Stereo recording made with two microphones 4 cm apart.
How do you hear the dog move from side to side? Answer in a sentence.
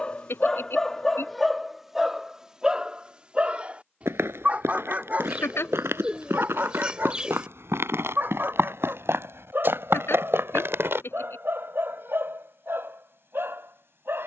In this clip you hear the dog travel towards the right.